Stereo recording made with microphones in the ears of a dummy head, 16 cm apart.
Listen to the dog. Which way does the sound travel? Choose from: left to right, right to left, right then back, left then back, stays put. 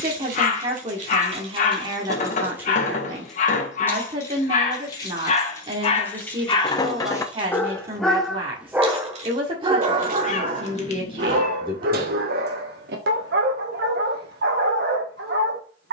left to right.